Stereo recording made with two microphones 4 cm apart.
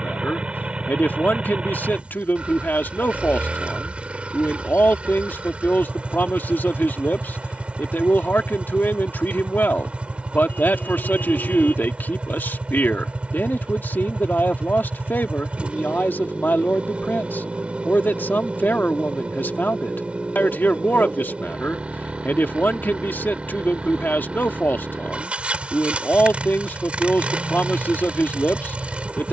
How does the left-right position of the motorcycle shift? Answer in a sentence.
In this clip you hear the motorcycle stay put.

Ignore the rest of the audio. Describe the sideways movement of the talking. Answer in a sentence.
You can hear the talking stay in one place.